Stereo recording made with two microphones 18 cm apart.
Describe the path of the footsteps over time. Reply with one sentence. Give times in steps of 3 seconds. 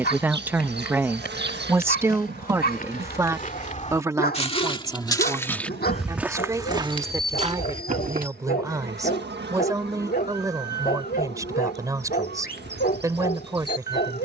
In this clip you hear the footsteps on the left from 0 s, on the right from 6 s and not at all from 9 s.